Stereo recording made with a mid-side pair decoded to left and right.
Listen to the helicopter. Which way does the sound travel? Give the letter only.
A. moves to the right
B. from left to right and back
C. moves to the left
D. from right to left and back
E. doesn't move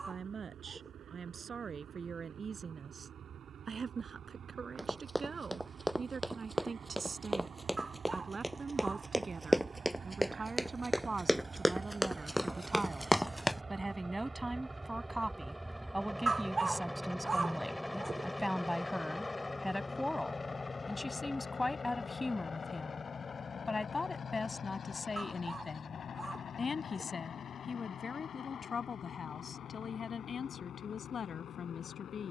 C.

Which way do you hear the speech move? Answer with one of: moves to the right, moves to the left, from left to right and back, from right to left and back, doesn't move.
moves to the left.